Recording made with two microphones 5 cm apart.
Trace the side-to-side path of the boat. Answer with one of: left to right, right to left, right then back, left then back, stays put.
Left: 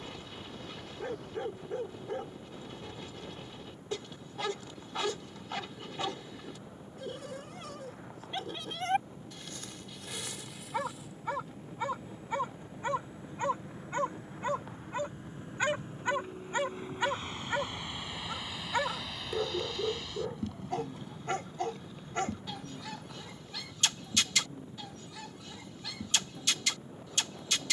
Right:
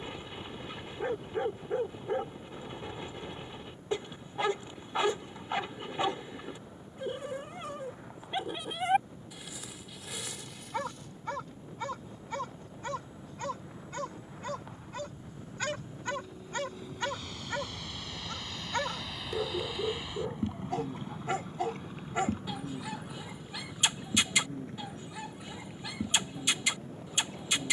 left to right.